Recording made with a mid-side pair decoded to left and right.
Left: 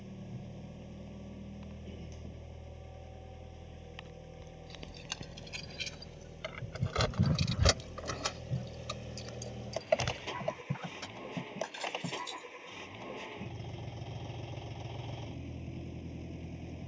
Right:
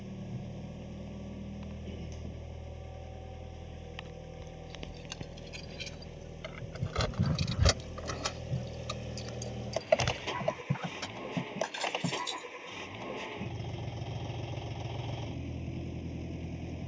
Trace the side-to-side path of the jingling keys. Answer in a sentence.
In this clip you hear the jingling keys move to the right.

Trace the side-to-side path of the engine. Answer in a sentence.
You can hear the engine stay in one place.